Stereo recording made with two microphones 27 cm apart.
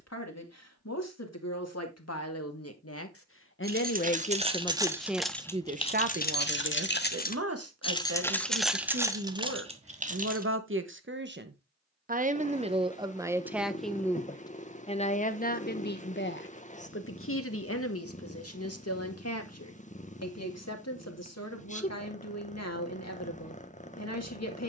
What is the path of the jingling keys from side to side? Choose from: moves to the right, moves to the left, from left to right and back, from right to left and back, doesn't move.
from right to left and back.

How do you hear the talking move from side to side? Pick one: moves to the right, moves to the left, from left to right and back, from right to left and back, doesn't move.
from left to right and back.